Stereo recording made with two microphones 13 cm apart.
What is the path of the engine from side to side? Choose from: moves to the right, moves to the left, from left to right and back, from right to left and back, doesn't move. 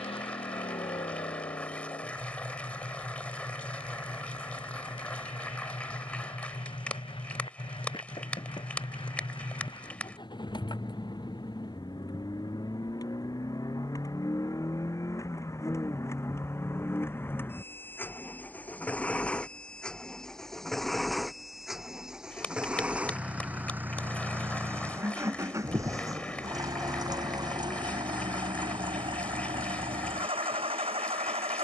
moves to the right.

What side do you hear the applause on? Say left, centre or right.
centre.